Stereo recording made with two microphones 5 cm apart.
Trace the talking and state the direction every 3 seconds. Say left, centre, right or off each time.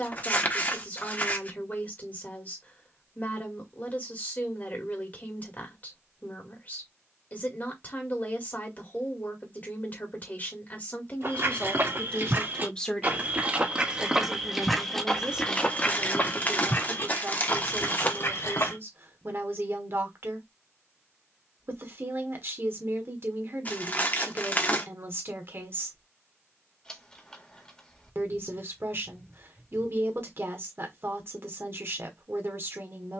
left, left, left, left, centre, right, right, right, right, right, right.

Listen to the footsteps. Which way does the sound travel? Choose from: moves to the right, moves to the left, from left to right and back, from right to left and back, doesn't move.
moves to the left.